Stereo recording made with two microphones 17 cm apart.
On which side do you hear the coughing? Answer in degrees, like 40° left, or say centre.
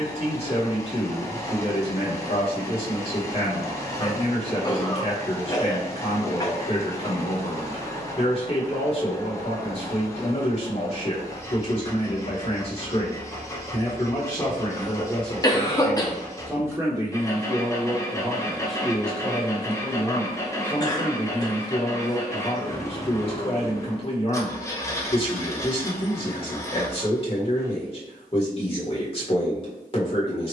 20° left.